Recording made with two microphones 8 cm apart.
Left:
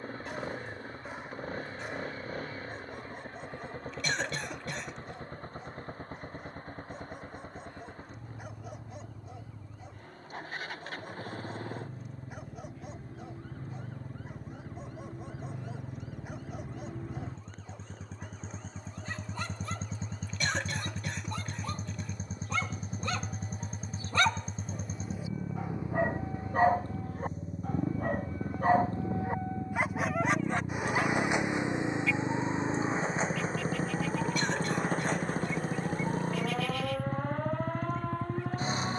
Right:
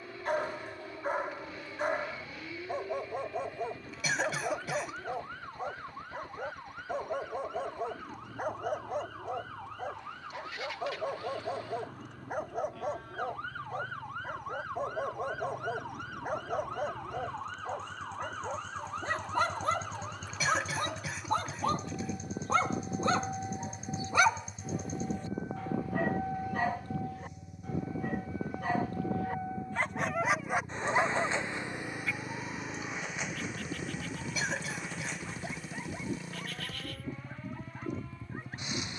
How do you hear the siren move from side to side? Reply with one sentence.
In this clip you hear the siren move from right to left.